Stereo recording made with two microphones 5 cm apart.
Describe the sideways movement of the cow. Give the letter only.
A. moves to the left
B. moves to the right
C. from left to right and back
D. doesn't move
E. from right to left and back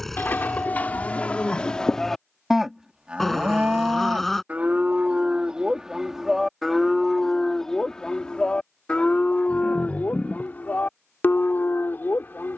C.